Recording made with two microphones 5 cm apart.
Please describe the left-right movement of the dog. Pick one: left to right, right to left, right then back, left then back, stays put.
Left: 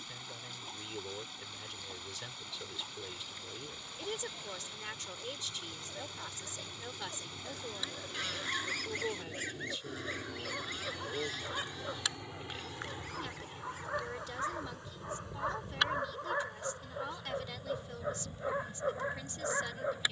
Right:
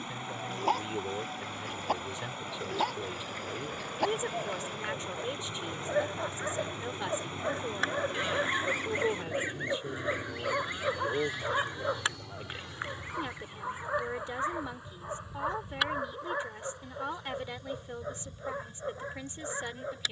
right to left.